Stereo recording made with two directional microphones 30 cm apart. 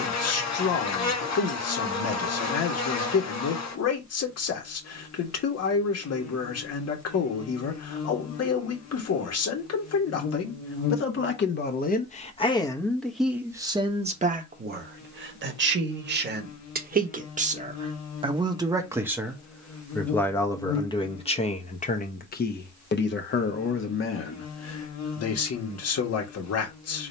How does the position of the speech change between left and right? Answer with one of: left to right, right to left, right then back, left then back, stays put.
right then back.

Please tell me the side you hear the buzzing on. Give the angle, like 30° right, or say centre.
60° left.